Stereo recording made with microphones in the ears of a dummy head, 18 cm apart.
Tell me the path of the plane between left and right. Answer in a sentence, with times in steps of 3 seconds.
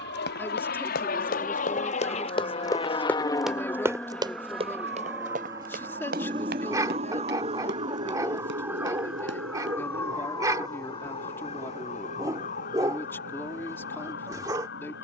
You can hear the plane on the left from 0 s, in the centre from 3 s and on the right from 6 s.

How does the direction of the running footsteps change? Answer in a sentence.
In this clip you hear the running footsteps move to the right.